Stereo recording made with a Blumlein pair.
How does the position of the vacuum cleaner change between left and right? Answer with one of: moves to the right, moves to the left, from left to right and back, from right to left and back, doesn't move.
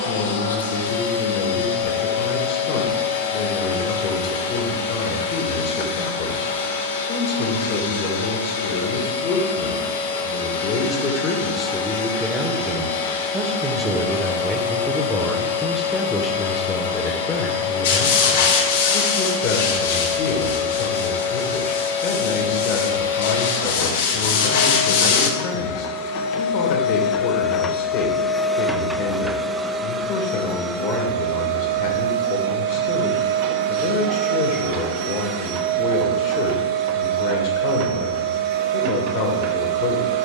moves to the right.